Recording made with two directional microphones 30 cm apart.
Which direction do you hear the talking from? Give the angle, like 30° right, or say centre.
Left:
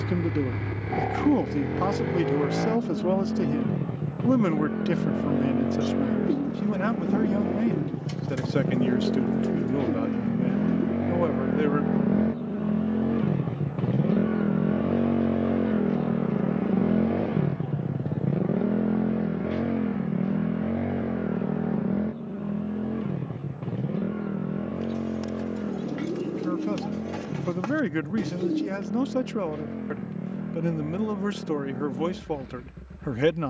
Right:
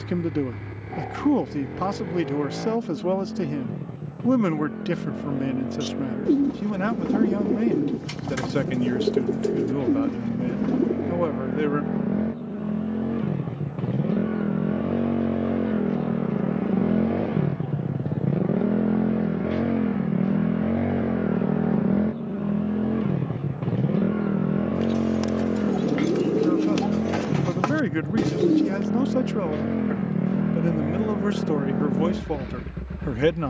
centre.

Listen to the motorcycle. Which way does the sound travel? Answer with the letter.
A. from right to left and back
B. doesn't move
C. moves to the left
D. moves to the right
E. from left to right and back
D.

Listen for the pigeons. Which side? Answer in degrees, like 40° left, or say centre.
50° right.